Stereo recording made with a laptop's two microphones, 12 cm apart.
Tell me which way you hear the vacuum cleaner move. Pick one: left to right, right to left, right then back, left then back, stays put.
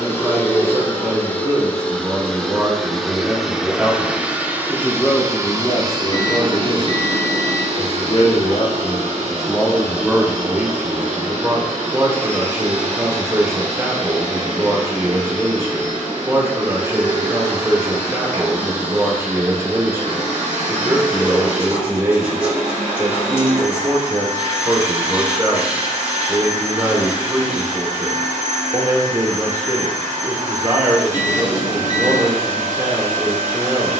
left to right.